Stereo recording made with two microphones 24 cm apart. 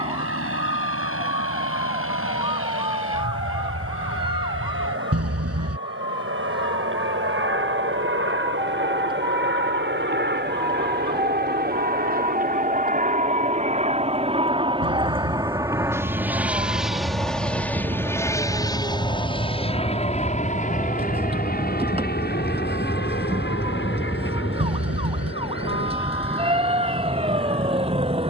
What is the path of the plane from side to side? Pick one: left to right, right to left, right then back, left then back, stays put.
right to left.